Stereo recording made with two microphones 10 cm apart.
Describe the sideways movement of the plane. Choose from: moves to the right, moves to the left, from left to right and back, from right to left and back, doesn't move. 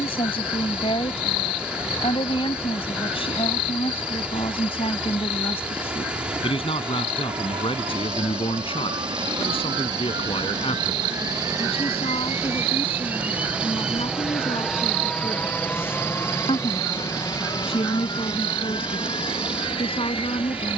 moves to the left.